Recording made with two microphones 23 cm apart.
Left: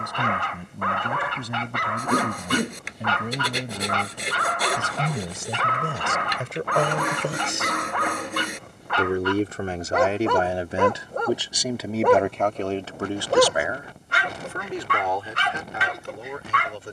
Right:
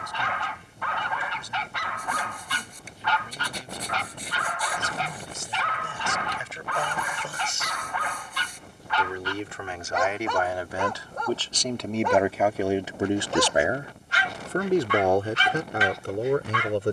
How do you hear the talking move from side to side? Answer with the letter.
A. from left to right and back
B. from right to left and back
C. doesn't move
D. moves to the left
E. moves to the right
E.